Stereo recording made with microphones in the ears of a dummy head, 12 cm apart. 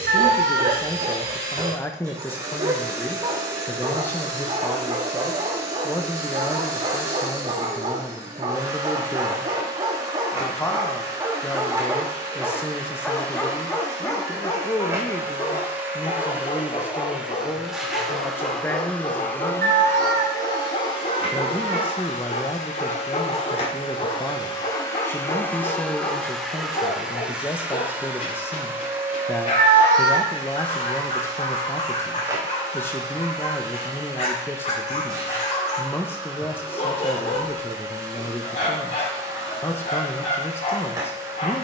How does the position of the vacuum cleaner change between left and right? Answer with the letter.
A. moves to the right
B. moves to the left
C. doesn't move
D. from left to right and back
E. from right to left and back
E.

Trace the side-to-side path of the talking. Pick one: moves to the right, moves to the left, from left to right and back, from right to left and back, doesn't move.
doesn't move.